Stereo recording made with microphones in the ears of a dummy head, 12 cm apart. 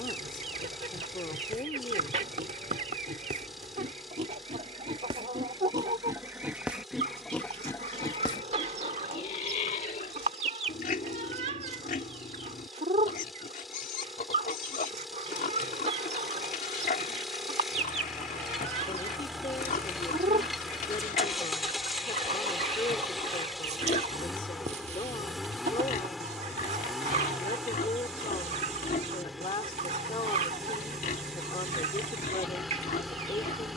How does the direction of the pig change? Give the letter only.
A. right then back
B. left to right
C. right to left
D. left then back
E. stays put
C.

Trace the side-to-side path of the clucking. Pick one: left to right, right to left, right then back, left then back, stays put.
stays put.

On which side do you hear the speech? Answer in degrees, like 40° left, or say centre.
40° left.